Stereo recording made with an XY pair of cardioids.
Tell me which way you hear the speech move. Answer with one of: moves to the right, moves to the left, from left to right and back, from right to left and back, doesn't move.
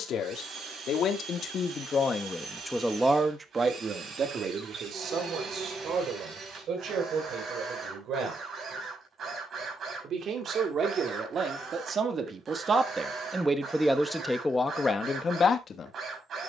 from left to right and back.